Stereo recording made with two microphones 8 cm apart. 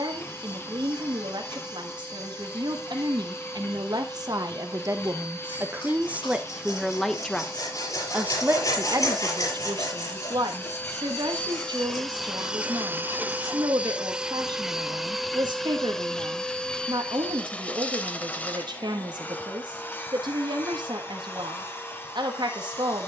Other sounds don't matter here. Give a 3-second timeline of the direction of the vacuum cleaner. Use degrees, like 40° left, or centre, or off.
30° left, 30° left, 30° left, 20° left, 10° right, 10° left, 20° left, 30° left.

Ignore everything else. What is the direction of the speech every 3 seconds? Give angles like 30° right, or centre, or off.
70° right, 50° right, 10° right, 60° right, 70° right, 70° right, 70° right, 70° right.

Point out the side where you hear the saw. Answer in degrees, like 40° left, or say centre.
50° left.